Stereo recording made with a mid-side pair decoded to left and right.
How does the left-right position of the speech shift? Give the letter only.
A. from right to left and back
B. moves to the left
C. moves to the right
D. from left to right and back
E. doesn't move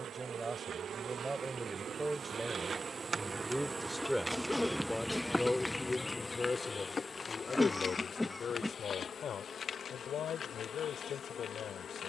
B.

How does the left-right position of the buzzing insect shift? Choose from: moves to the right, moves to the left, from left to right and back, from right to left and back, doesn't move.
moves to the left.